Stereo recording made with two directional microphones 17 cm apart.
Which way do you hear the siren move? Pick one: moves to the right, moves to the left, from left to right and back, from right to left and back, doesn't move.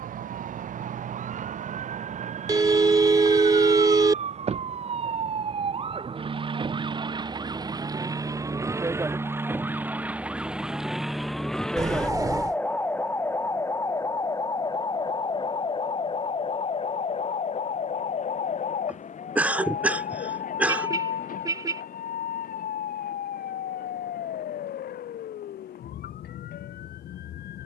moves to the left.